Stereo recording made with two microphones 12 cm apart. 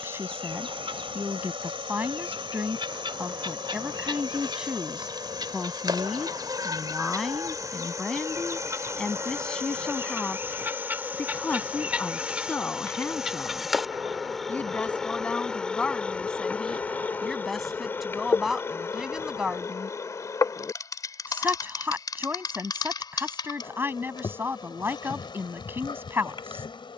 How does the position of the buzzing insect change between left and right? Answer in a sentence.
In this clip you hear the buzzing insect move to the left.